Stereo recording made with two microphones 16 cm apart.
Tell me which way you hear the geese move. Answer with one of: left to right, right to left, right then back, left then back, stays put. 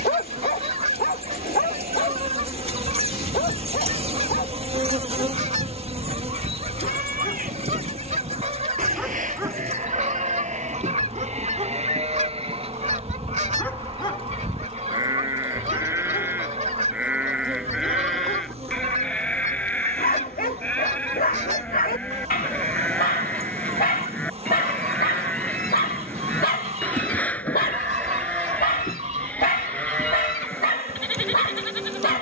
stays put.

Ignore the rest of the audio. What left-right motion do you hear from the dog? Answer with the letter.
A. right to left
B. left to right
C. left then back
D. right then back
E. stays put
D.